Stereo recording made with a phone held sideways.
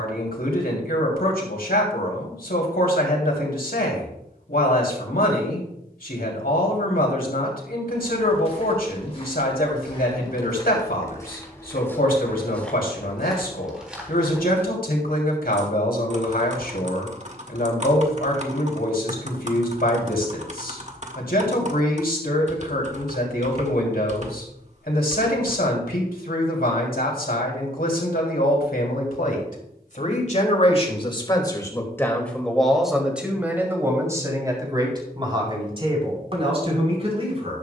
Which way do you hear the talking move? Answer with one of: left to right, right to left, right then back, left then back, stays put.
left to right.